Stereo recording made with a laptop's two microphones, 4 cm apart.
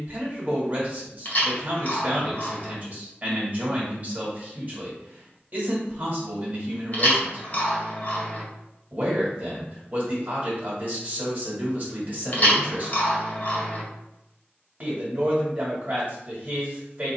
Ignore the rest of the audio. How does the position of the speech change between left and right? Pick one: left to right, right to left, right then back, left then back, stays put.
stays put.